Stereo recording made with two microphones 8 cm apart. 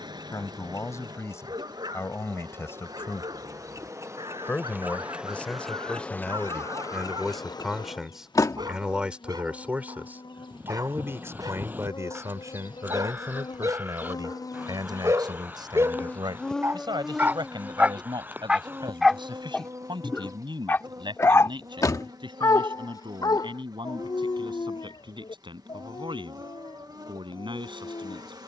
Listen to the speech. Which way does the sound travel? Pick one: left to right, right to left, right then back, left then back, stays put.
left to right.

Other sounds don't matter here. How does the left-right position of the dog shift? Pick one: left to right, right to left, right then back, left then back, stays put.
right to left.